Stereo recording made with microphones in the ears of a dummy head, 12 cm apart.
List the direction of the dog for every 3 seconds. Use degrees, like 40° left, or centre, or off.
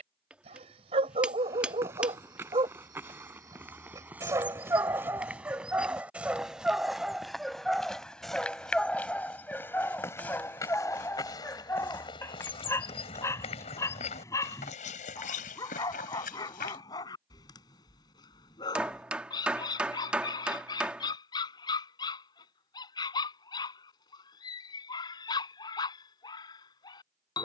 40° right, 20° right, centre, 10° left, 20° left, 30° left, 30° left, 30° left, 30° left.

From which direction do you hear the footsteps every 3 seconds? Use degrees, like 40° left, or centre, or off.
20° right, 10° right, centre, 20° left, 50° left, 70° left, off, off, off.